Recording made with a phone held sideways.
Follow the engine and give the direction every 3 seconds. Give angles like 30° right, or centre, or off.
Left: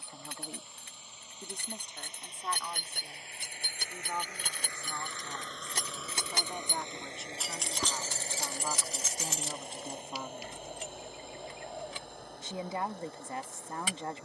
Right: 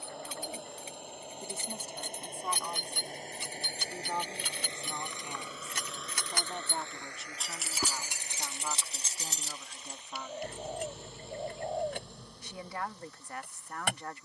60° right, 30° right, 30° left, 60° left, 70° left.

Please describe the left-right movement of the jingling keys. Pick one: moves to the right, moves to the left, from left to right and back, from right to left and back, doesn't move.
moves to the right.